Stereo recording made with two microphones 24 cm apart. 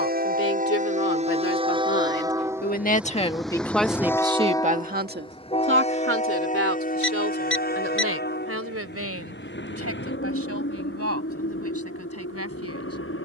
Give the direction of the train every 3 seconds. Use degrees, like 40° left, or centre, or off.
20° right, 10° left, 40° left, 50° left, 60° left.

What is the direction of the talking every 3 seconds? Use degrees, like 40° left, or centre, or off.
60° left, 20° right, 70° right, 80° right, 80° right.